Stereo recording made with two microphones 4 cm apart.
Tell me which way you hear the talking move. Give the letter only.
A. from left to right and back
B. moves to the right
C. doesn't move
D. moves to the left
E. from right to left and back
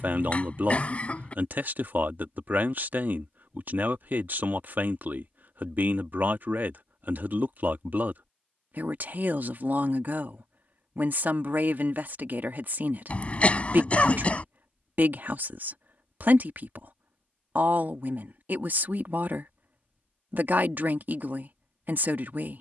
C.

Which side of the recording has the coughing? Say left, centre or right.
left.